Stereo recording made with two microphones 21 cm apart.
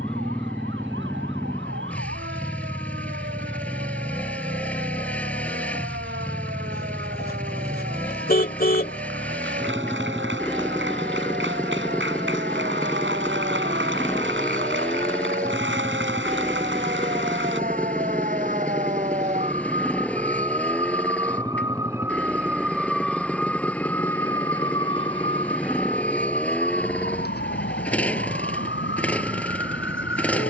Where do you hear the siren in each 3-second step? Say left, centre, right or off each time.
right, right, right, right, right, right, right, centre, left, left.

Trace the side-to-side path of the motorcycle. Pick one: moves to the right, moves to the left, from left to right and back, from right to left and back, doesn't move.
doesn't move.